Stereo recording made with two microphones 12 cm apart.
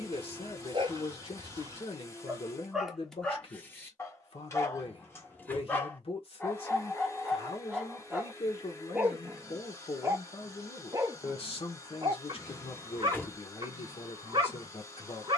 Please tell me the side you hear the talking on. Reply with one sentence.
In this clip you hear the talking on the left.